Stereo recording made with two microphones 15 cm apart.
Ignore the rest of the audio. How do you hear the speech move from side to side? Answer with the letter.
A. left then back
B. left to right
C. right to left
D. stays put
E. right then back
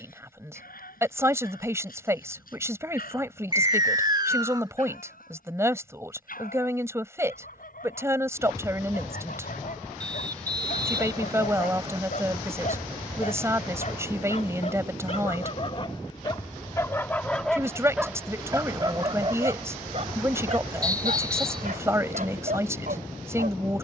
D.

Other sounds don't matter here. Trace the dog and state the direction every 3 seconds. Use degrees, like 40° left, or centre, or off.
70° left, 70° left, 70° left, 70° left, 50° left, 20° left, 40° right, 70° right.